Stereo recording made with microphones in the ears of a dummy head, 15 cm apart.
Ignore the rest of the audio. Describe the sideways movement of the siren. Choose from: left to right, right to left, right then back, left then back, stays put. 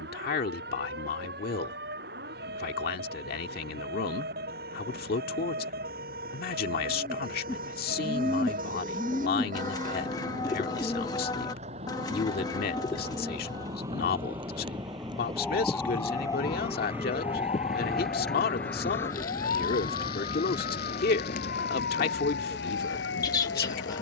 right to left.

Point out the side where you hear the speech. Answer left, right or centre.
left.